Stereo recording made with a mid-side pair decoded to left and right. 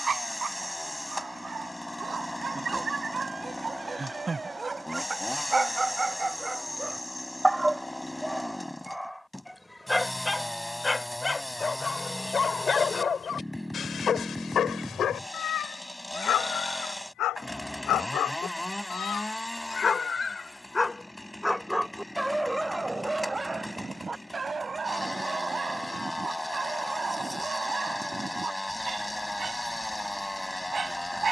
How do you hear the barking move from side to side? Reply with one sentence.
In this clip you hear the barking move from right to left and back again.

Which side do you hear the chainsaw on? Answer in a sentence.
In this clip you hear the chainsaw in the centre.